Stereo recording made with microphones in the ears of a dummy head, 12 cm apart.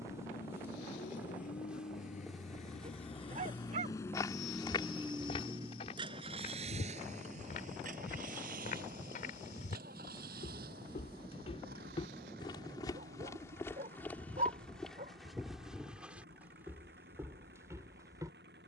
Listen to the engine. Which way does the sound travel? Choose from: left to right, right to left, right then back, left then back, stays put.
left to right.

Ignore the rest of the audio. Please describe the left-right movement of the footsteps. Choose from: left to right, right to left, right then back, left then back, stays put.
left then back.